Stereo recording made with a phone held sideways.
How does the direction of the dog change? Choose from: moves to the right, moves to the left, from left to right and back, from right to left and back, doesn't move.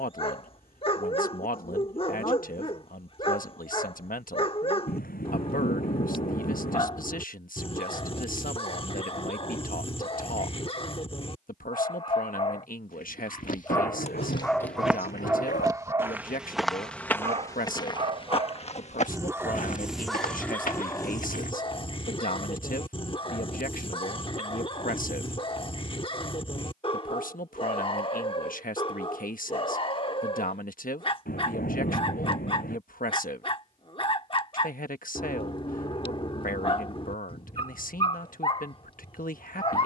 from left to right and back.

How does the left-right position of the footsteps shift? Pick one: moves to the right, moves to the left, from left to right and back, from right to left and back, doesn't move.
from left to right and back.